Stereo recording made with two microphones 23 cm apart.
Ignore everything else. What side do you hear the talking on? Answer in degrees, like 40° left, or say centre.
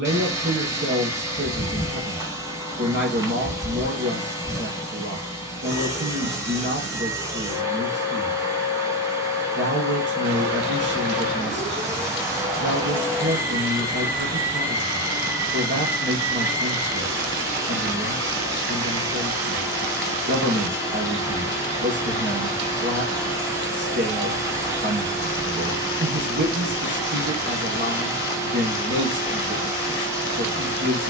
50° right.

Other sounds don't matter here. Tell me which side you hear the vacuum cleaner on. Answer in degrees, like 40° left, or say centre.
10° right.